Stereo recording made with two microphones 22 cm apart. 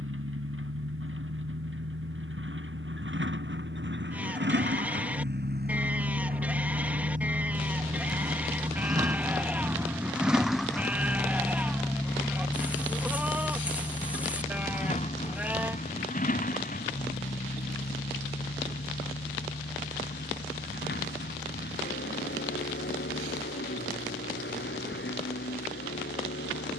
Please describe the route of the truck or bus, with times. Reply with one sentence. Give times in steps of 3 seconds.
You can hear the truck or bus on the right from 0 s, in the centre from 9 s and on the left from 12 s.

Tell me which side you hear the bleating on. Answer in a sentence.
In this clip you hear the bleating in the centre.